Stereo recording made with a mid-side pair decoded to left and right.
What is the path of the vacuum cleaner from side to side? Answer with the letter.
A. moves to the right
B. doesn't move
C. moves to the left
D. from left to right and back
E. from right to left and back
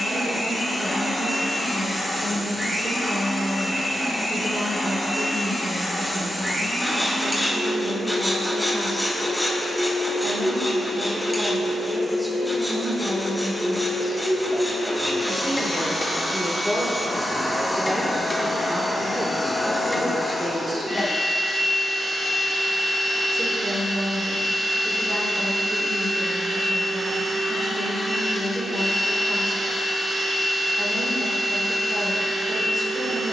B.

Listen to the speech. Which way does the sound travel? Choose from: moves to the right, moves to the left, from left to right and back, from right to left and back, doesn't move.
from right to left and back.